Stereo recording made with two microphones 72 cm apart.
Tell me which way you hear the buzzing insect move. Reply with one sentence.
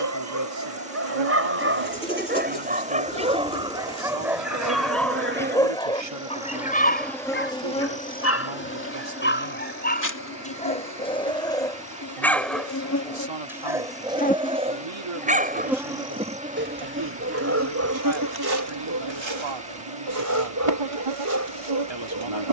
You can hear the buzzing insect go left and come back.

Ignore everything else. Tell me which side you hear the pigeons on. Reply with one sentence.
In this clip you hear the pigeons in the centre.